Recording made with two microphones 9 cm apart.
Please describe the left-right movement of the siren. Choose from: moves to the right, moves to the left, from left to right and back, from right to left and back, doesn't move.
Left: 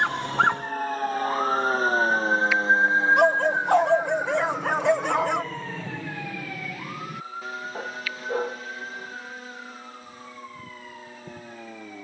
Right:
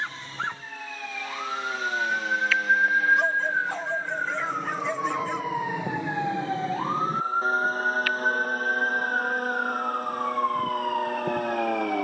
moves to the right.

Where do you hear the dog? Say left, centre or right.
left.